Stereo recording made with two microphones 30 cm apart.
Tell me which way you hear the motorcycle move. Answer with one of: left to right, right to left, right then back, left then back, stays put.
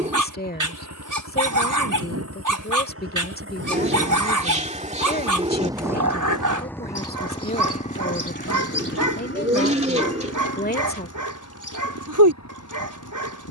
right to left.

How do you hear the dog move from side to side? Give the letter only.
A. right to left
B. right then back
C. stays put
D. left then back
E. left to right
C.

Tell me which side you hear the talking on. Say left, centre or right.
left.